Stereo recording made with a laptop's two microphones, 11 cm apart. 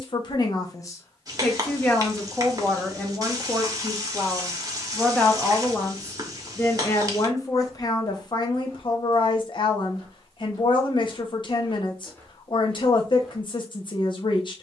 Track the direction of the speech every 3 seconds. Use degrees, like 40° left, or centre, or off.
20° left, centre, 30° left, 50° left, 50° left.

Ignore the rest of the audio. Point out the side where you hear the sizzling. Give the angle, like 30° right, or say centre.
30° right.